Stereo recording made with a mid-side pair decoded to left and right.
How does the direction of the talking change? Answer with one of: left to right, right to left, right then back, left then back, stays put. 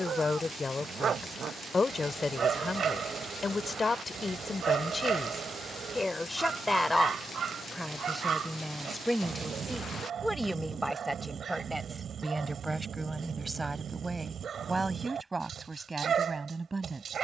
left to right.